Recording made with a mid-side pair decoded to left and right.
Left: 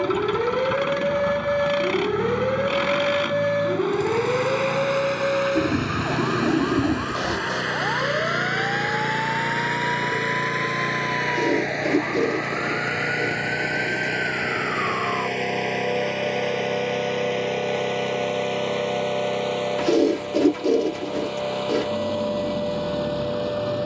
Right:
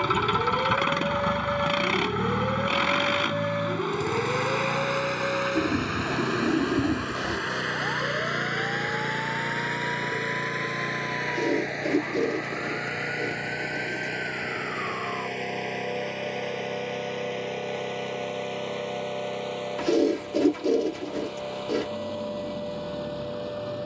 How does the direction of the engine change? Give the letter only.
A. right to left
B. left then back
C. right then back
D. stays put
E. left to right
A.